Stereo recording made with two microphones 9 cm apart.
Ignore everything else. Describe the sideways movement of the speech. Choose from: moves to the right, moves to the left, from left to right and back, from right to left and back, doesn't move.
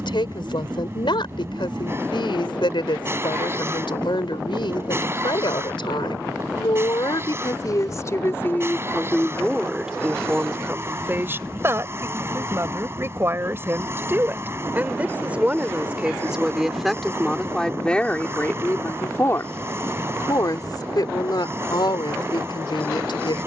from left to right and back.